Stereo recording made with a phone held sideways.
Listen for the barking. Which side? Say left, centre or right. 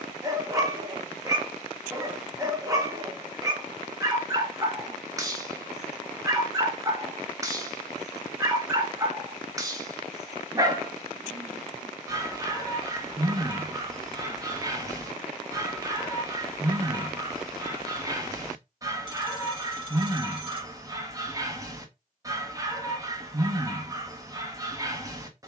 right.